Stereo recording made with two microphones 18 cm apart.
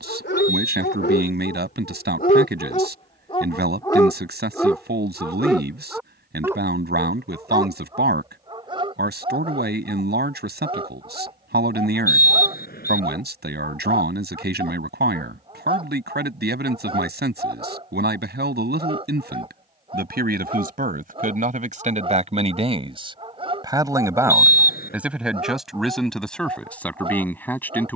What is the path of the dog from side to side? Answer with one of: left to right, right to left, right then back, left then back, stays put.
left to right.